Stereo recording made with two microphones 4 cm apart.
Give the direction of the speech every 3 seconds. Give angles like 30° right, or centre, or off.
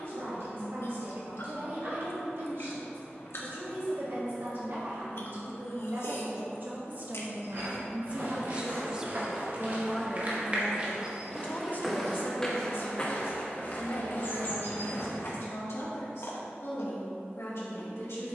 70° right, 60° right, 40° right, 10° left, 60° left, 80° left.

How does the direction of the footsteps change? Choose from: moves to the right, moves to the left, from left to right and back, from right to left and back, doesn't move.
moves to the left.